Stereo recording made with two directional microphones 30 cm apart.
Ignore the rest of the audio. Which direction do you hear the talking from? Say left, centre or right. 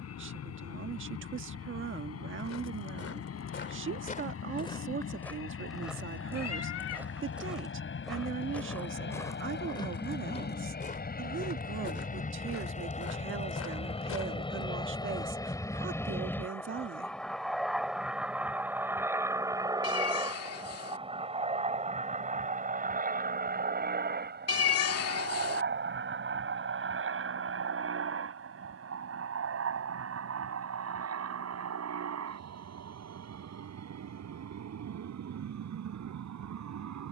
right.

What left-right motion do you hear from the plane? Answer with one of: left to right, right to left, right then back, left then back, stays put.
left to right.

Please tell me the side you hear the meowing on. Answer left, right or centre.
left.